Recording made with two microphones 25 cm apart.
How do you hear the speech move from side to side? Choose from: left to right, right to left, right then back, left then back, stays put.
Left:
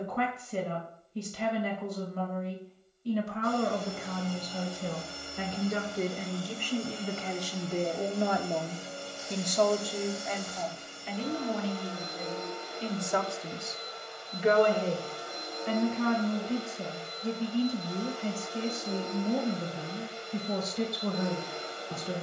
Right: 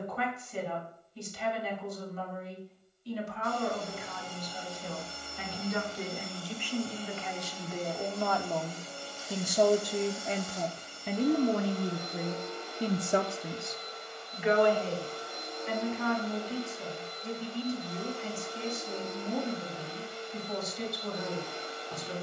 right then back.